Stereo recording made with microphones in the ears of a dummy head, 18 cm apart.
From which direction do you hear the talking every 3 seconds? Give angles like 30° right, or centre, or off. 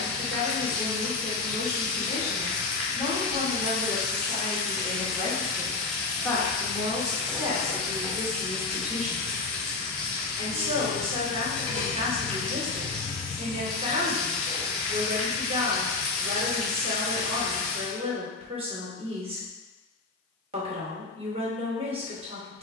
centre, 30° left, 10° right, 30° right, 30° right, 30° right, 30° right, 30° right.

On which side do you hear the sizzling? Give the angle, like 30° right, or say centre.
centre.